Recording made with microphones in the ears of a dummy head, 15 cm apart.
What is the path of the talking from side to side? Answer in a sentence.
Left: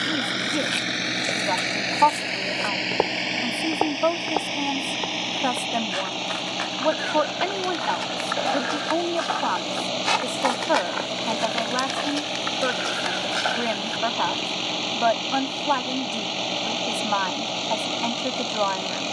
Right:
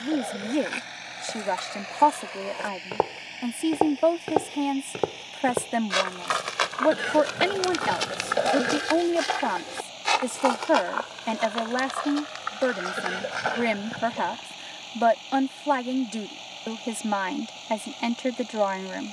You can hear the talking stay put.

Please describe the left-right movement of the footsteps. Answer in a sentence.
In this clip you hear the footsteps move from left to right and back again.